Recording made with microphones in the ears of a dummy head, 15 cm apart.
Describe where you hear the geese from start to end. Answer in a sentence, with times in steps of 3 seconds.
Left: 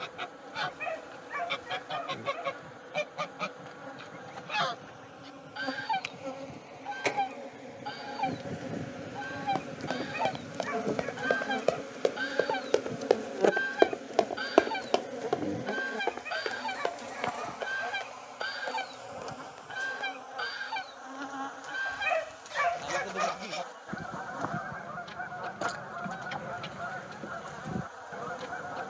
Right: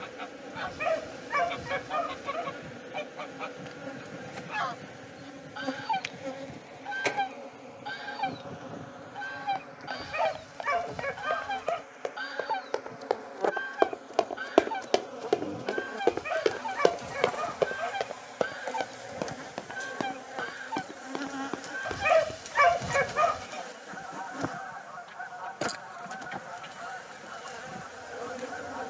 You can hear the geese on the left from 0 s, in the centre from 6 s and on the left from 12 s.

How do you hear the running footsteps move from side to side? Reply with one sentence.
You can hear the running footsteps go from the left side to the right.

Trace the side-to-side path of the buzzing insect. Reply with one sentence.
You can hear the buzzing insect go left and come back.